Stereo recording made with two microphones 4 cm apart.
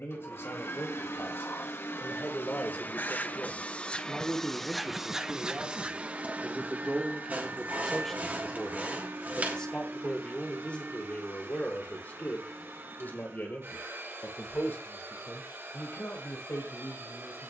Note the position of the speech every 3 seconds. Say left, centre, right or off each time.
left, centre, centre, left, left, left.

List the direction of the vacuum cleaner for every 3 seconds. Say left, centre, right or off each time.
left, centre, right, right, right, right.